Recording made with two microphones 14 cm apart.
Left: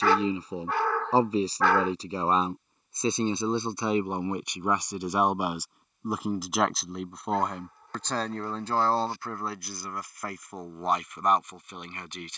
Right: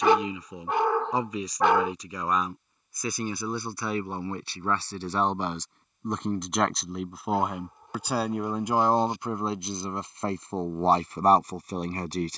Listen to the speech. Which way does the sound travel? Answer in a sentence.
In this clip you hear the speech move from left to right.